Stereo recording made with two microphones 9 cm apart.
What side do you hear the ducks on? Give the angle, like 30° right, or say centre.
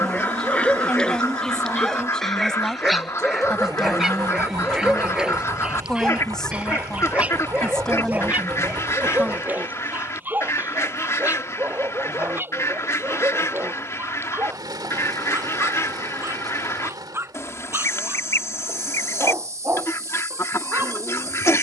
30° left.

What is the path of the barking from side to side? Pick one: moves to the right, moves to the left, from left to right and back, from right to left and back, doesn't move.
moves to the right.